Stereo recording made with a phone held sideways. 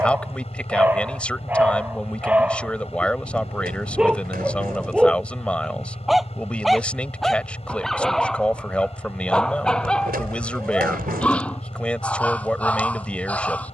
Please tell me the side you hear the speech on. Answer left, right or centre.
centre.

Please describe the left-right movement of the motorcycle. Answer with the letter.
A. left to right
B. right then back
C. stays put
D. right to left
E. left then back
C.